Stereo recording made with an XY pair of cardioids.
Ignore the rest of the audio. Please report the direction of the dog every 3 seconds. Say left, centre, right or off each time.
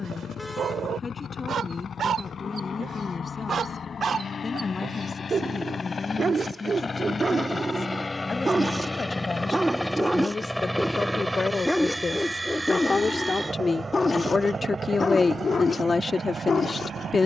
right, right, right, centre, left, left.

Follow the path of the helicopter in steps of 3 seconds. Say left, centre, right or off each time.
left, left, left, centre, right, right.